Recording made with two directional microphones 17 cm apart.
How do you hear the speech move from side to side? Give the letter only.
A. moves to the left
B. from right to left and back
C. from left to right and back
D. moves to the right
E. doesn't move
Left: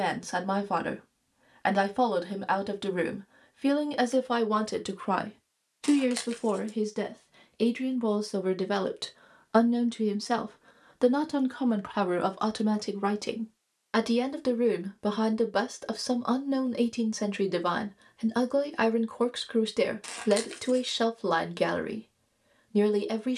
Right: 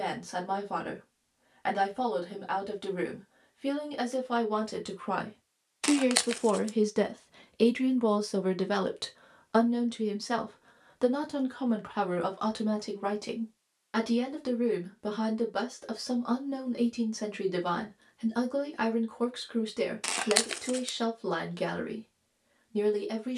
C.